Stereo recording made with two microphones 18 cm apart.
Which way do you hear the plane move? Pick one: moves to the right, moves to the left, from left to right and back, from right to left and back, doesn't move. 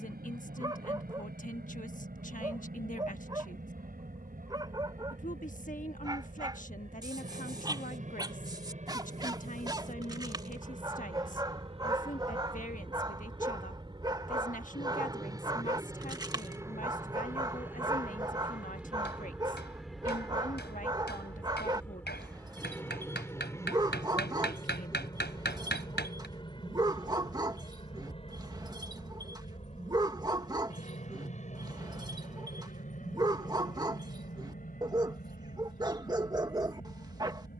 moves to the left.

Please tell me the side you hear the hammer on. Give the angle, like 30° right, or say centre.
70° left.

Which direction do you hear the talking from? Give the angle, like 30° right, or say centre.
50° left.